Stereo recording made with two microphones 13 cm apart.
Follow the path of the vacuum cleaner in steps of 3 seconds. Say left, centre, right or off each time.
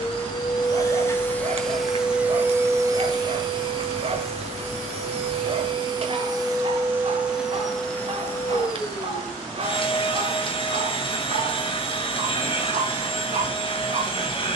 centre, right, centre, left, left.